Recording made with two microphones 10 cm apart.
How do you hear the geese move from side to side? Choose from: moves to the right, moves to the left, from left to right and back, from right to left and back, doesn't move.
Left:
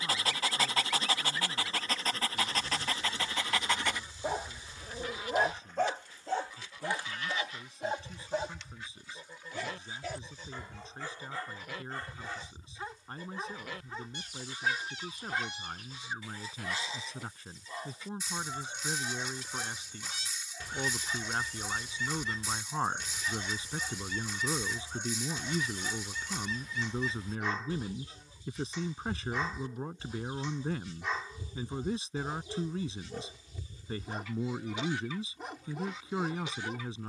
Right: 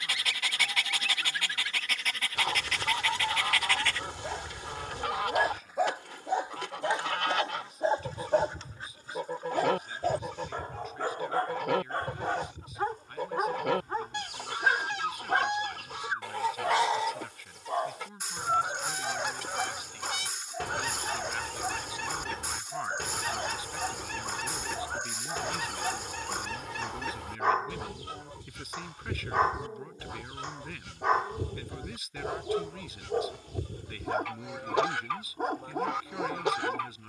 doesn't move.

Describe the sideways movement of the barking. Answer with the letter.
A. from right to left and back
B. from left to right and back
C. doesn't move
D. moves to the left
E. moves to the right
E.